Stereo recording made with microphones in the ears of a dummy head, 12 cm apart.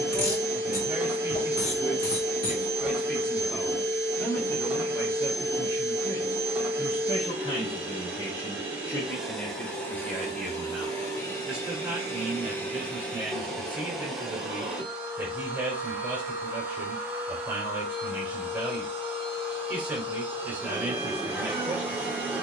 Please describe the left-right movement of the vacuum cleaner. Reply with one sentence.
You can hear the vacuum cleaner go left and come back.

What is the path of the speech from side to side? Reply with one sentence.
You can hear the speech move from right to left and back again.